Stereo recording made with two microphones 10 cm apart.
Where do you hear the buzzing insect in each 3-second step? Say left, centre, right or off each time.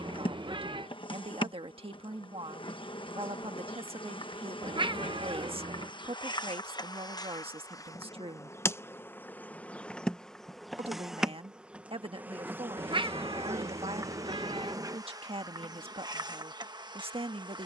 left, left, left, centre, right, right.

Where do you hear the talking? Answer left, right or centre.
right.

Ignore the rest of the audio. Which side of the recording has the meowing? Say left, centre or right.
right.